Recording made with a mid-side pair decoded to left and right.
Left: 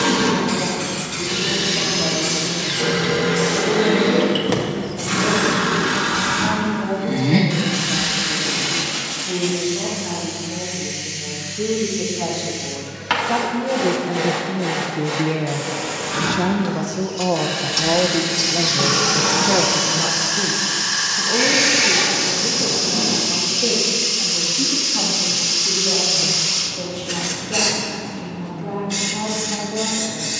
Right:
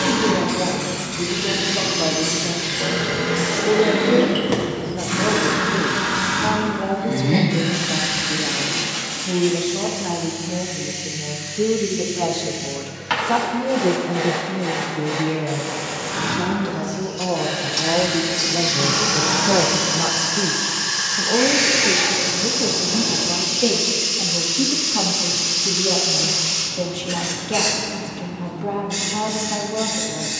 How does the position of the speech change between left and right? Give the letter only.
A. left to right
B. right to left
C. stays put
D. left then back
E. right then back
D.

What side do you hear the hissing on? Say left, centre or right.
left.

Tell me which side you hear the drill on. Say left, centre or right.
left.